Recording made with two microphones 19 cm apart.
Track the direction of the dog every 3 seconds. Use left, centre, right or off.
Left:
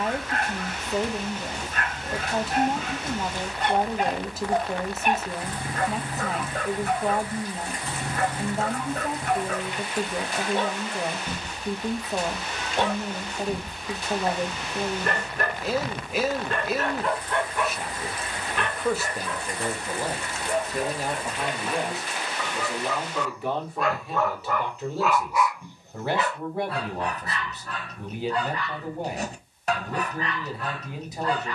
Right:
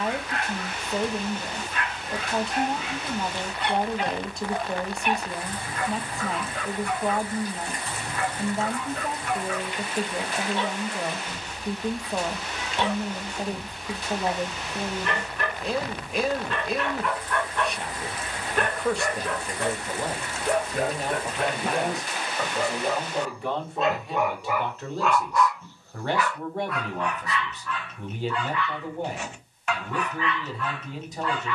left, left, left, left, left, left, right, right, centre, left, left.